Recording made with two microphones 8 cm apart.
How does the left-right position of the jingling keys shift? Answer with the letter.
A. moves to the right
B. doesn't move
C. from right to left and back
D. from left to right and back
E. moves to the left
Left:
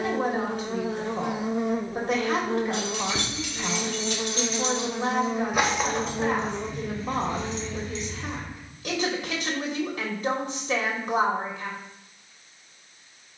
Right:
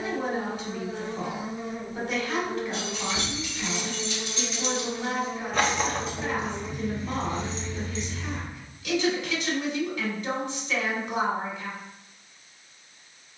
A.